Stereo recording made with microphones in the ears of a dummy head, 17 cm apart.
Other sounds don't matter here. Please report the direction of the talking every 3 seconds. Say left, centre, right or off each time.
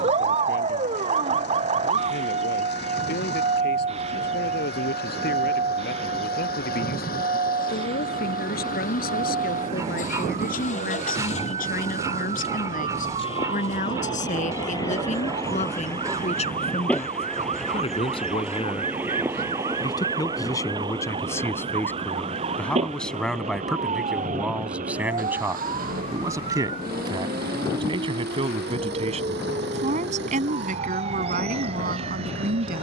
left, left, left, left, left, left, left, centre, centre, right, right.